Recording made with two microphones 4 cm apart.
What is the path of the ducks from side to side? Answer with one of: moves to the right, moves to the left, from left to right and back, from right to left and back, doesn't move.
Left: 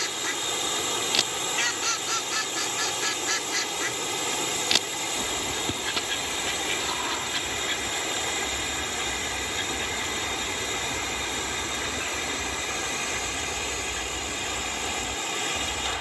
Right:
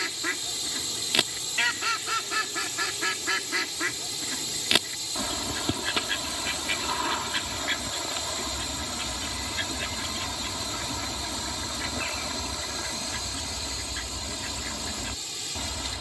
doesn't move.